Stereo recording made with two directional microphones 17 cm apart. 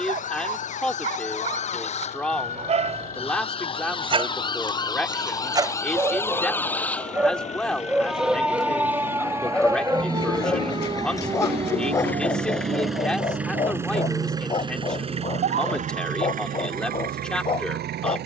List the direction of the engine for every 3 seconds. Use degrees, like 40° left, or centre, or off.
50° left, 50° left, 40° left, 20° left, 10° right, 50° right.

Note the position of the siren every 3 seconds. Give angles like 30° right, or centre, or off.
40° left, 20° left, centre, 20° right, 40° right, 60° right.